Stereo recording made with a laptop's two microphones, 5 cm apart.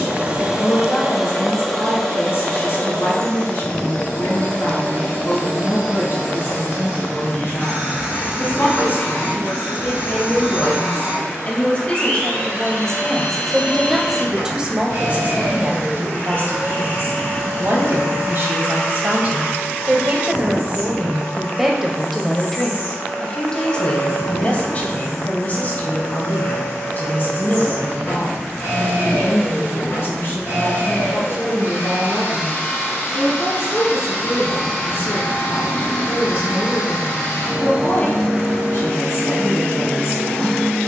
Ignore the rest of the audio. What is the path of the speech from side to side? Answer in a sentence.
In this clip you hear the speech move from left to right and back again.